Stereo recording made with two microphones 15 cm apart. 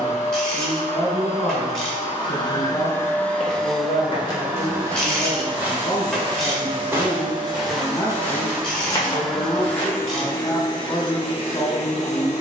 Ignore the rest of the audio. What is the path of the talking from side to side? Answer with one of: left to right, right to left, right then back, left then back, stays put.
stays put.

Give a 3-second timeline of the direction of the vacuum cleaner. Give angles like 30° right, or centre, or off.
40° left, 10° right, 30° right, 20° left.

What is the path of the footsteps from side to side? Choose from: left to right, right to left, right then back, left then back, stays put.
right then back.